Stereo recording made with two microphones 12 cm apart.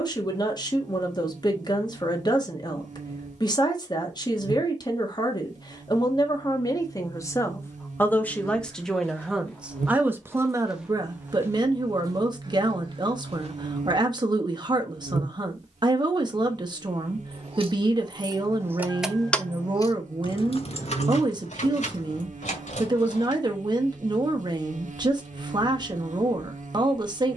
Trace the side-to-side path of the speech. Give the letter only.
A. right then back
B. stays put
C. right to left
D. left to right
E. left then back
D.